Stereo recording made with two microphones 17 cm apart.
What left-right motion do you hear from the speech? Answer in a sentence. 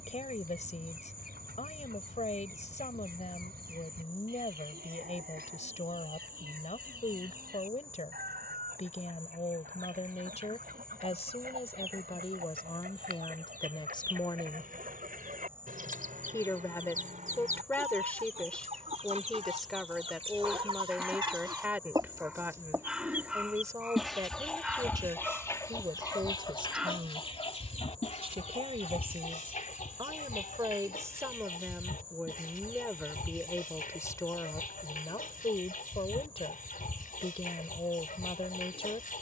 In this clip you hear the speech move from left to right and back again.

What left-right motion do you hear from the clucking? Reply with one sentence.
You can hear the clucking travel towards the left.